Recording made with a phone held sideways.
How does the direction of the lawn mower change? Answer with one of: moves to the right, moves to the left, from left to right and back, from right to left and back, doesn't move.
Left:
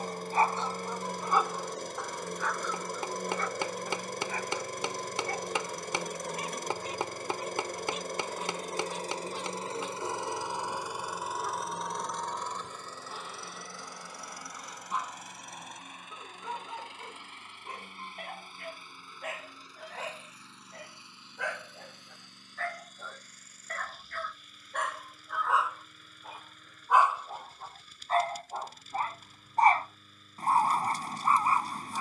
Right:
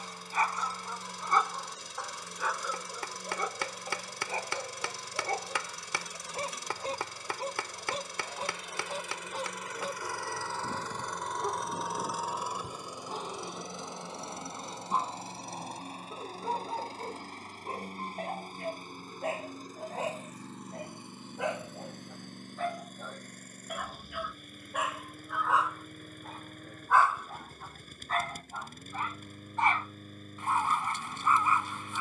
moves to the right.